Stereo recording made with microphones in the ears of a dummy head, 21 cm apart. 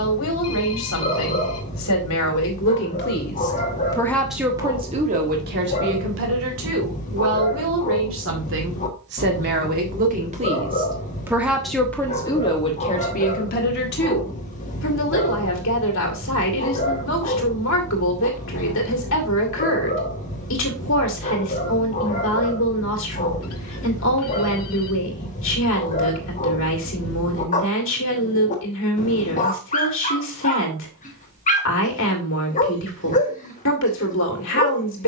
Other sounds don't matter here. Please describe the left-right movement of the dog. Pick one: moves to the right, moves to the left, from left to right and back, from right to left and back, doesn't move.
doesn't move.